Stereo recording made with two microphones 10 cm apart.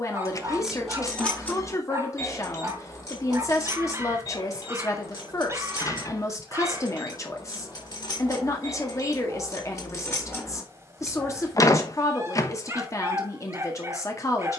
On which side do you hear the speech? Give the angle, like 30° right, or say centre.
30° left.